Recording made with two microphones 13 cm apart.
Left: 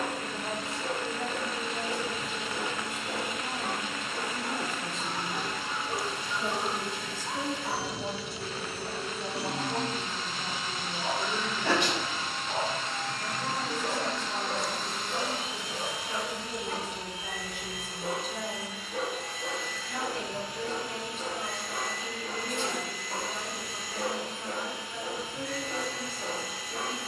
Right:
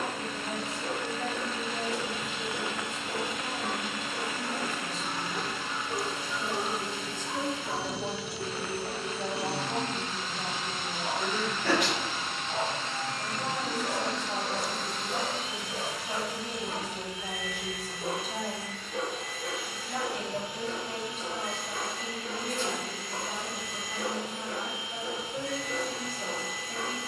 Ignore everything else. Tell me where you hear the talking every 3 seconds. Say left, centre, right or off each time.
left, left, centre, right, right, right, right, right, right.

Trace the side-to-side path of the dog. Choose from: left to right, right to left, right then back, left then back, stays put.
right then back.